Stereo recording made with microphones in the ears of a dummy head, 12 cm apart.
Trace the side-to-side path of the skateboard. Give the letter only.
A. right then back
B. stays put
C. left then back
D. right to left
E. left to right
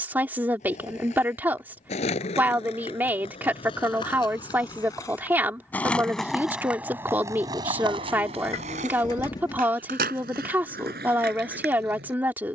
E.